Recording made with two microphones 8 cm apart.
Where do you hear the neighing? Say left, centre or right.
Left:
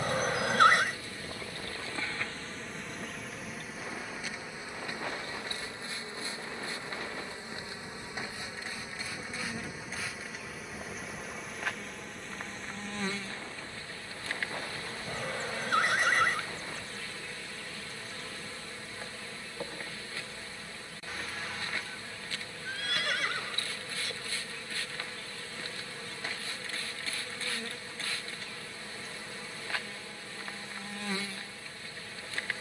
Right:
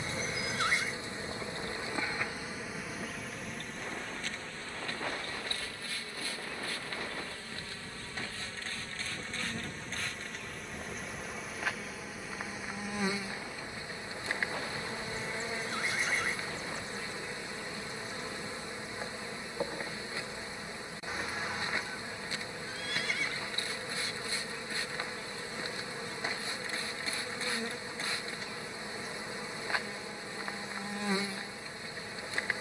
left.